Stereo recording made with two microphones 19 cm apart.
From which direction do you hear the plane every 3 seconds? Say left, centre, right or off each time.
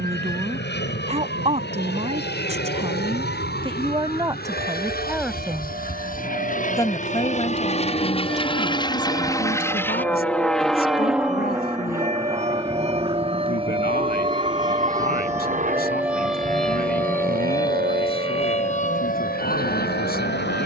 left, left, left, centre, right, right, right.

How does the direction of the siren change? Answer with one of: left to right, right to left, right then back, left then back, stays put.
right to left.